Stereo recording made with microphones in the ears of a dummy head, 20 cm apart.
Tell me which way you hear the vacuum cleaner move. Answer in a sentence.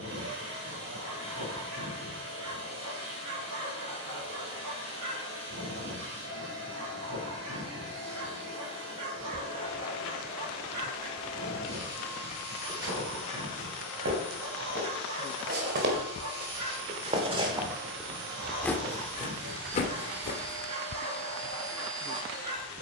In this clip you hear the vacuum cleaner stay in one place.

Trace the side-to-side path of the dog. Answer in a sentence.
In this clip you hear the dog stay in one place.